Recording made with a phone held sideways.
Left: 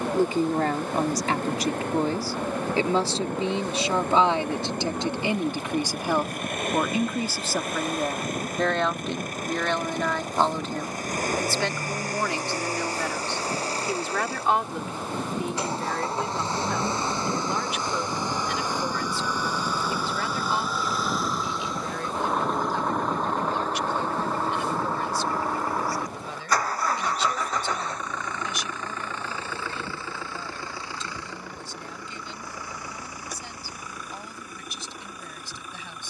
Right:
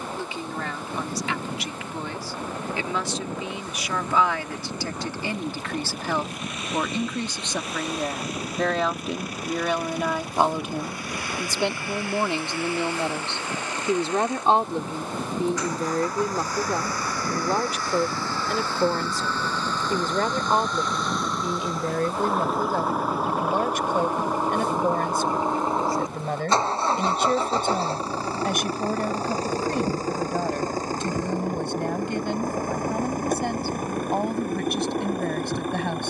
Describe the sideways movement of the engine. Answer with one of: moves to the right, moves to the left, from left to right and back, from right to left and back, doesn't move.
moves to the right.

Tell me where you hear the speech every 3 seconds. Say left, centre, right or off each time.
left, left, centre, centre, right, right, right, right, right, right, right, right.